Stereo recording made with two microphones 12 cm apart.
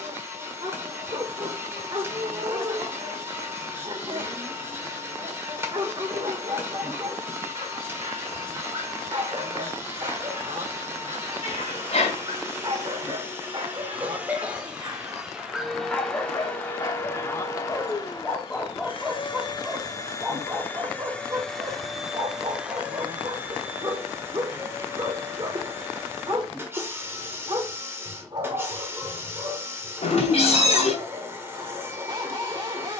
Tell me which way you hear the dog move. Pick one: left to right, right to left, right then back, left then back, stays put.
left then back.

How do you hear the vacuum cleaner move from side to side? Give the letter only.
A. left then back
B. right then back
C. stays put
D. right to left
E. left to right
A.